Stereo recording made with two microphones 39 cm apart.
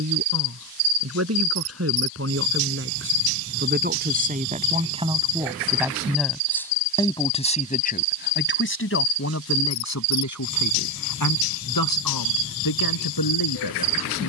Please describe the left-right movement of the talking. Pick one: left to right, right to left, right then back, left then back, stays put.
right to left.